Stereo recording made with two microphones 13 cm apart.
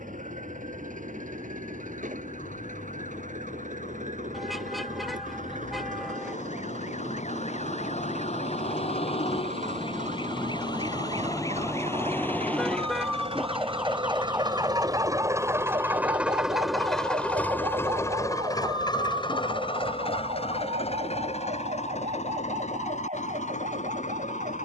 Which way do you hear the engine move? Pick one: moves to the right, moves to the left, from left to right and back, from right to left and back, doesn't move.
moves to the left.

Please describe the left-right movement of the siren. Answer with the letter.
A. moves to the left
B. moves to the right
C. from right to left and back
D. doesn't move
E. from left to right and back
B.